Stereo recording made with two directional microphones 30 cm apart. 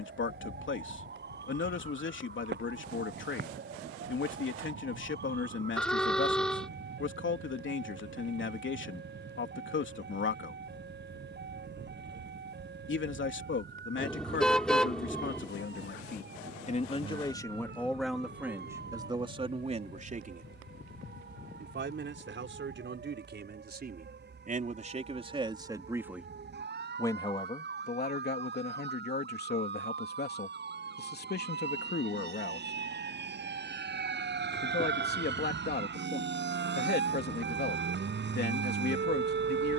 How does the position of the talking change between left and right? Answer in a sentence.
In this clip you hear the talking go right and come back.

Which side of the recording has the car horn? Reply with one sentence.
You can hear the car horn in the centre.